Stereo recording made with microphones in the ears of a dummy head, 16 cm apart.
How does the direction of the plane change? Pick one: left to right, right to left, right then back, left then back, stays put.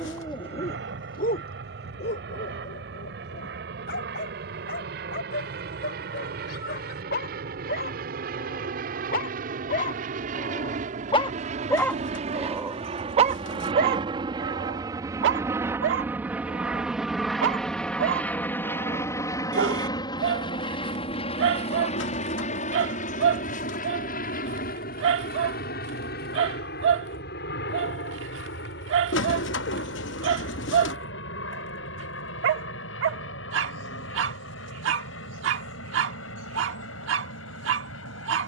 right to left.